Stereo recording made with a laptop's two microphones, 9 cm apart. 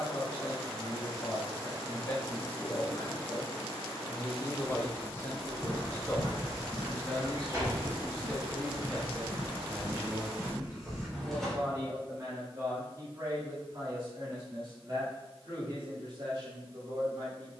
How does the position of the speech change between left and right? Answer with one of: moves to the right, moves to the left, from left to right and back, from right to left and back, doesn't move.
moves to the right.